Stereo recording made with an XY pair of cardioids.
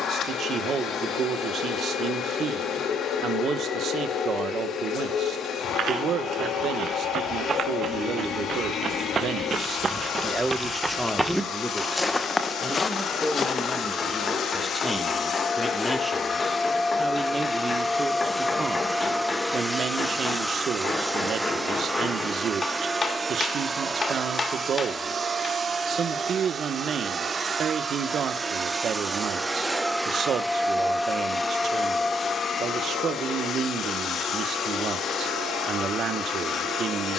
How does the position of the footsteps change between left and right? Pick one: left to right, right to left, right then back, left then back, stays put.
right to left.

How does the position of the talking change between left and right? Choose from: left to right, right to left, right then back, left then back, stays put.
left then back.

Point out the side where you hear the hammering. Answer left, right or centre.
left.